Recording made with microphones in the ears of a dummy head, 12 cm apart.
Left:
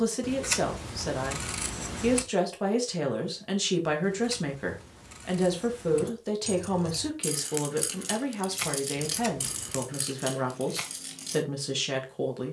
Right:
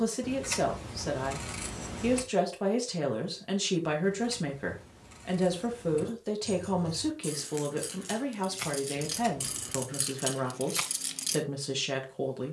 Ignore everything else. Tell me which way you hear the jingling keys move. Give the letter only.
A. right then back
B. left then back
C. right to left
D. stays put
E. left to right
E.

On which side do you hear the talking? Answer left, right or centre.
centre.